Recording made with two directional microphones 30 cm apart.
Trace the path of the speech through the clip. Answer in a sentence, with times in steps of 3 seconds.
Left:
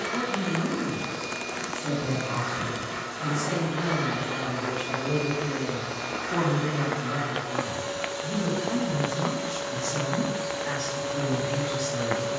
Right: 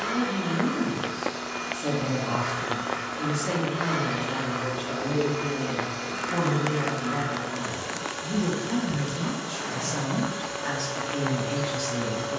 In this clip you hear the speech on the right from 0 s, in the centre from 6 s and on the right from 9 s.